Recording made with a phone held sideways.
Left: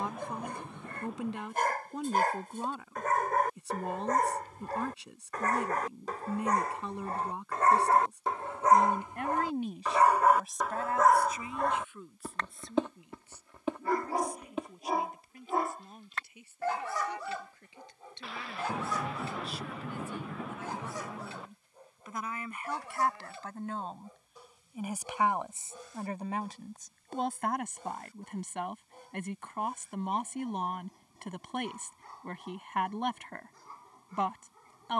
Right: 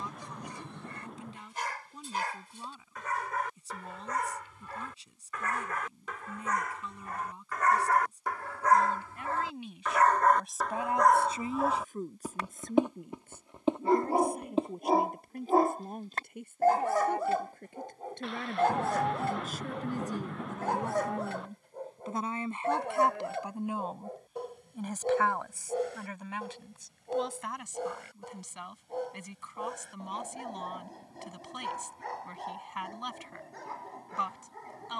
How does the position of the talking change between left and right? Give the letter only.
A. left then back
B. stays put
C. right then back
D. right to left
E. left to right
C.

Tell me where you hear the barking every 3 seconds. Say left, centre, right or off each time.
left, left, left, centre, right, right, right, right, right, right, right, right.